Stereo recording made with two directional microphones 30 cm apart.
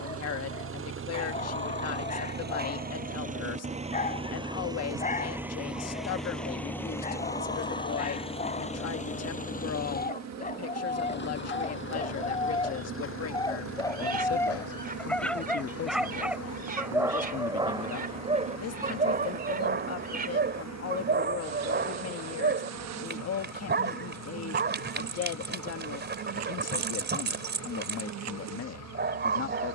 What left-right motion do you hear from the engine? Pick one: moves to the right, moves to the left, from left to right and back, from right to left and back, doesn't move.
moves to the left.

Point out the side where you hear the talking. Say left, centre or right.
left.